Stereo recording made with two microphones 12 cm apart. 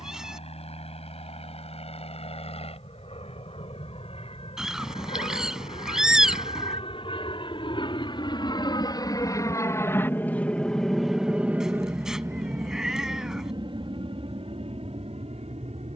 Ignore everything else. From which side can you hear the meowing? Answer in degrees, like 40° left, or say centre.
centre.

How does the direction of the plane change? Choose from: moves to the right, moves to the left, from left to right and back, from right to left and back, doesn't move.
moves to the right.